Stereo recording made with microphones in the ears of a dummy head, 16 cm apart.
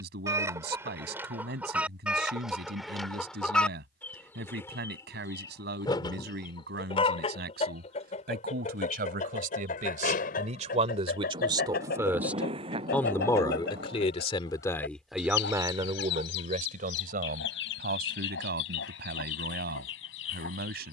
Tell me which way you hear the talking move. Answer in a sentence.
You can hear the talking move from right to left and back again.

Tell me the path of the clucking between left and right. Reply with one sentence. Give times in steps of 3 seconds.
You can hear the clucking in the centre from 0 s and on the left from 6 s.